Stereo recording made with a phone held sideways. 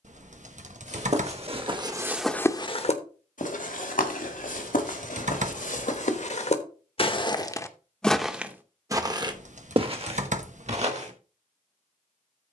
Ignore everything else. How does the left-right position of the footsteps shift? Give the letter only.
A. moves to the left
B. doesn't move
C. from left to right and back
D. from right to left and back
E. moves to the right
D.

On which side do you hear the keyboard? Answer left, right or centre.
right.